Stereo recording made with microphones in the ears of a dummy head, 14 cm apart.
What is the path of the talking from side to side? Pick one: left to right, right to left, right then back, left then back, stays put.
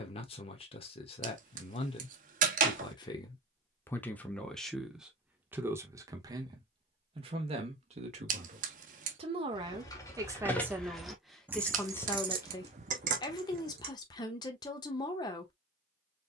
right then back.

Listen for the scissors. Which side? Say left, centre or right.
right.